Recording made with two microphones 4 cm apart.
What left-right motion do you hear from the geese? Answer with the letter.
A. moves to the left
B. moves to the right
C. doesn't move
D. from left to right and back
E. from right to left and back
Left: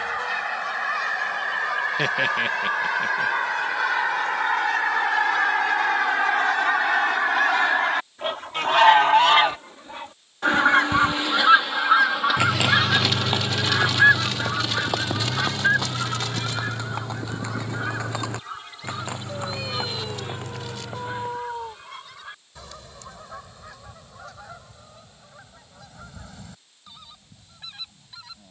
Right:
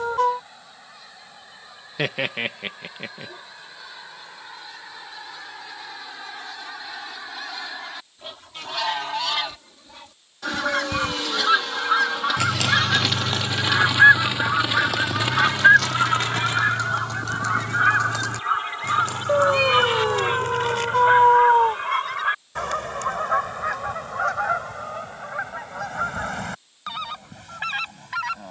B.